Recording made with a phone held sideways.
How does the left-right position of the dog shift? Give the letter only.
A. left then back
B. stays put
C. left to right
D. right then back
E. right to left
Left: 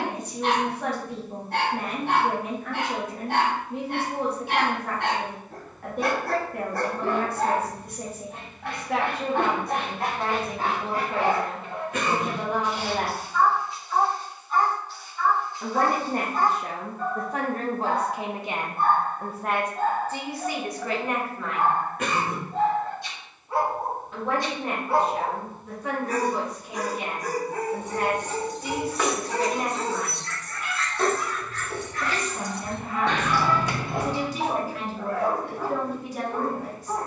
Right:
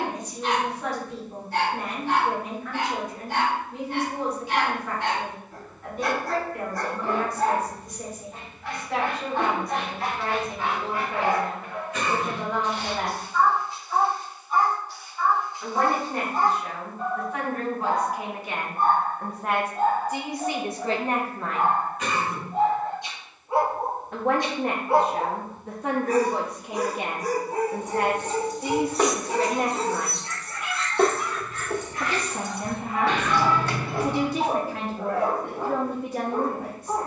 C.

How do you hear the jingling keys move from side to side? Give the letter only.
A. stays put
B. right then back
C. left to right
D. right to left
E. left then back
B.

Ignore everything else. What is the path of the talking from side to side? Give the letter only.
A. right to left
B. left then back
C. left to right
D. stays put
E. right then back
C.